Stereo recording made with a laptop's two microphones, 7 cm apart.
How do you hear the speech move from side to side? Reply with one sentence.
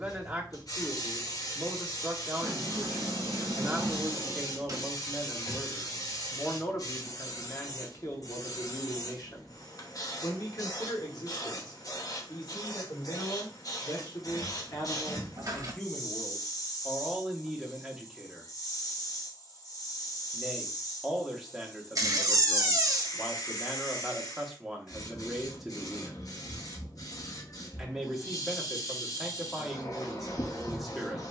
You can hear the speech go left and come back.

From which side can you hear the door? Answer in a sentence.
In this clip you hear the door on the right.